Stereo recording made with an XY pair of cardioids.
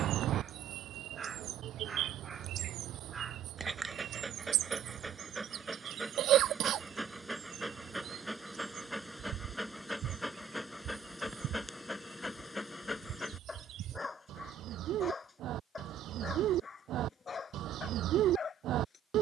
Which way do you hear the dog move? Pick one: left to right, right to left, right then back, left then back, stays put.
right to left.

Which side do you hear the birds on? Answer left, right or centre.
right.